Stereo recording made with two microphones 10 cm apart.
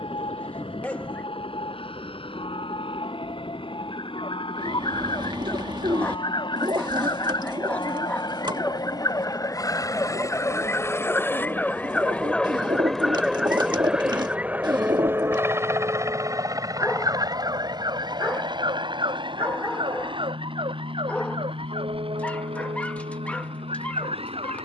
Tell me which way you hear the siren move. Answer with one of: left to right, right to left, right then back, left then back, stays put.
left to right.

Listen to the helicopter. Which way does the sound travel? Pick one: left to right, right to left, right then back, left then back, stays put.
left to right.